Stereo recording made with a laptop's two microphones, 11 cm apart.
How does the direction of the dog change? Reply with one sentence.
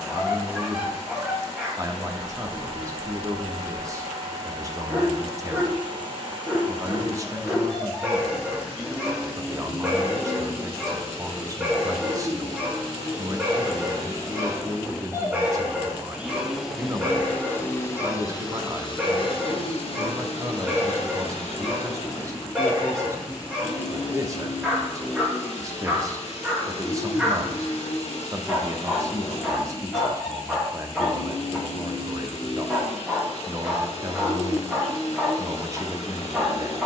You can hear the dog stay put.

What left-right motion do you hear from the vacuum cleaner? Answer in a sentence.
You can hear the vacuum cleaner go from the right side to the left.